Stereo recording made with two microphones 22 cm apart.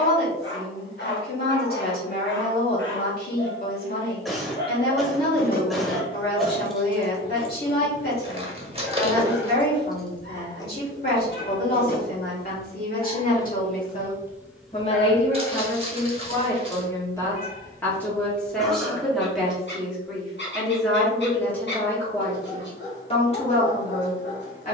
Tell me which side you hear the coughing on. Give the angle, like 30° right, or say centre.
centre.